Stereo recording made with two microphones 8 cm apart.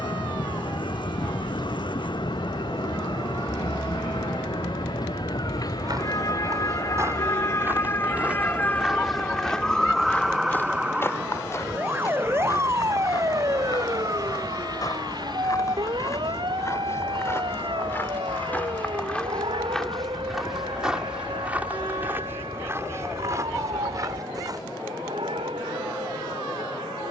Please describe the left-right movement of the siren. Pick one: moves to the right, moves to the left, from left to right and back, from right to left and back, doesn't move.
moves to the right.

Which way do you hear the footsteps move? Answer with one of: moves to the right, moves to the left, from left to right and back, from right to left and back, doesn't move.
from right to left and back.